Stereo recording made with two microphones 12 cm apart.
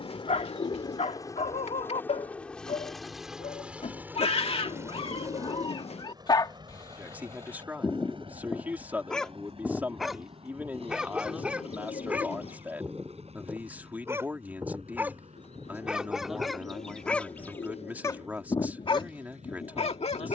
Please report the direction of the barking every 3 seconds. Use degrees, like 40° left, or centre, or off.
70° left, 50° left, 20° left, centre, 20° right, centre, 50° left.